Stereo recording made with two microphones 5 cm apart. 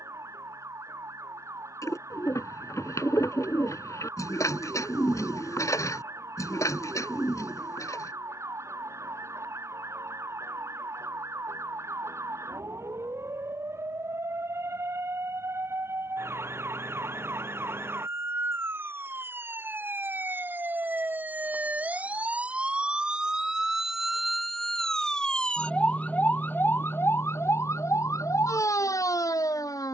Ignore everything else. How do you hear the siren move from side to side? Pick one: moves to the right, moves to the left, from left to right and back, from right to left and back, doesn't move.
moves to the left.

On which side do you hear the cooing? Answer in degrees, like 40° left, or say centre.
60° left.